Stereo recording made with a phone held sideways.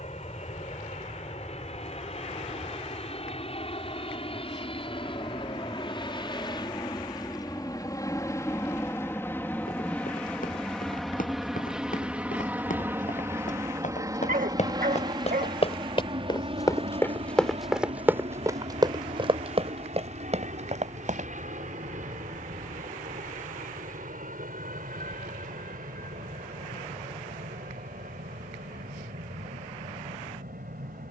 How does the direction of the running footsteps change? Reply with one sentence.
You can hear the running footsteps move to the right.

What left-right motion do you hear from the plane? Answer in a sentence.
You can hear the plane travel towards the right.